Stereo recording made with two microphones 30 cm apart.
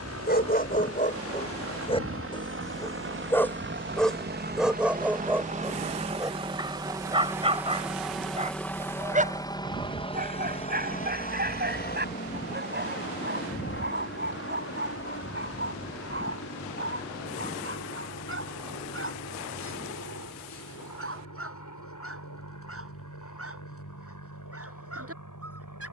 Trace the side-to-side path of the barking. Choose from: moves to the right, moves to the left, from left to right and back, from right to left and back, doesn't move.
moves to the right.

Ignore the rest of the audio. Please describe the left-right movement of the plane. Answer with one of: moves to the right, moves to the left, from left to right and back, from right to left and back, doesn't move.
moves to the left.